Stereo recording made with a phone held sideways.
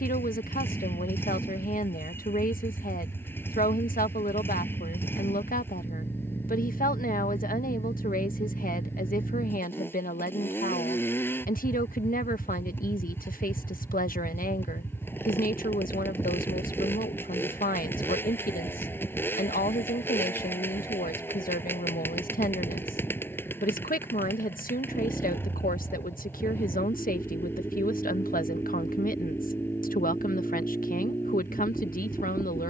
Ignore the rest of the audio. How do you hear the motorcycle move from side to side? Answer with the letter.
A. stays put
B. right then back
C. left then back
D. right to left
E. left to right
A.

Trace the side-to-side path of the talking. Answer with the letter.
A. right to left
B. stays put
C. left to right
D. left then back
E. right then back
B.